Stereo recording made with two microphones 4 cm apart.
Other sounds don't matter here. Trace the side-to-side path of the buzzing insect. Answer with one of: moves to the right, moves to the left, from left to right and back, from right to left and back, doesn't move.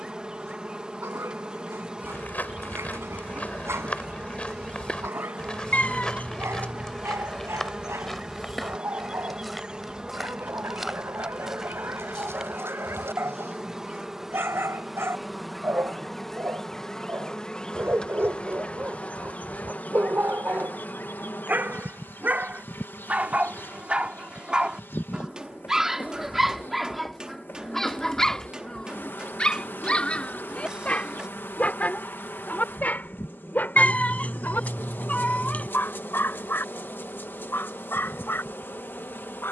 moves to the left.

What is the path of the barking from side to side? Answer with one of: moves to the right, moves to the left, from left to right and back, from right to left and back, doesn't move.
moves to the left.